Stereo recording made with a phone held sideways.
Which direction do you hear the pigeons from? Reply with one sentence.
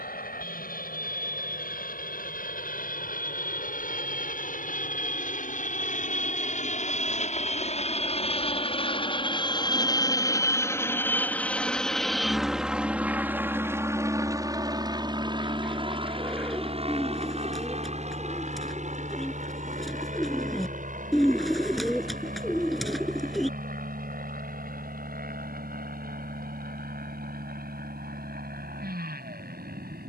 You can hear the pigeons in the centre.